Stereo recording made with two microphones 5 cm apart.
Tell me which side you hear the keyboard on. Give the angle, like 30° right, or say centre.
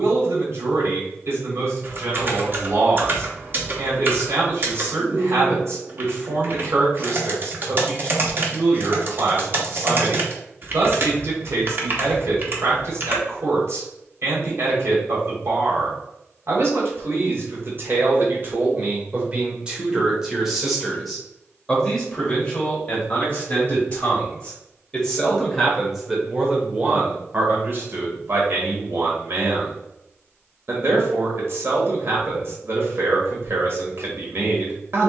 40° right.